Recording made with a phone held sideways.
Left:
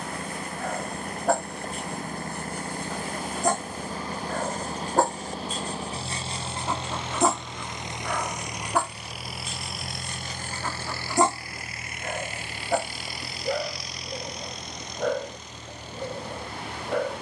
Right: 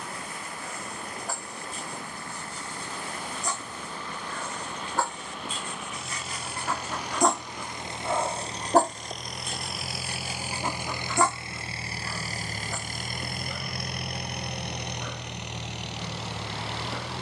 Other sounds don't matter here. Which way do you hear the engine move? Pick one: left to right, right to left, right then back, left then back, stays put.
left to right.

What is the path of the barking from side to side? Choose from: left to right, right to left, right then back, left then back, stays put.
right then back.